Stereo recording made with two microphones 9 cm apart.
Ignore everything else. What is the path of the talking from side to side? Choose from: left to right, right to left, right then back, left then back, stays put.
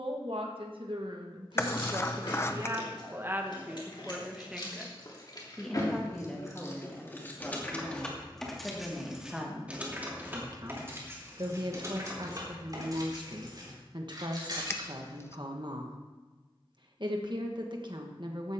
left then back.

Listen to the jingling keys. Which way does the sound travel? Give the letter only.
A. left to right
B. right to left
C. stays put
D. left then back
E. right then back
A.